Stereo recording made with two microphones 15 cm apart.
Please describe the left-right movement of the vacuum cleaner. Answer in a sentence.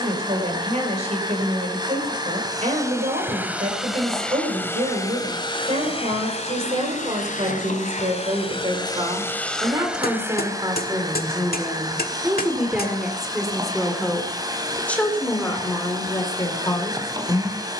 You can hear the vacuum cleaner move from right to left and back again.